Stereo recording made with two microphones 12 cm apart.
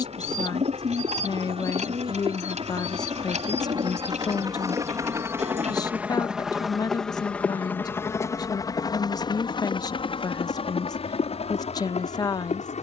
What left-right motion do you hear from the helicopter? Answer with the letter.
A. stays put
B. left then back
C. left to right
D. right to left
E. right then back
D.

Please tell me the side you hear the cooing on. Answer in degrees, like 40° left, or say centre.
70° right.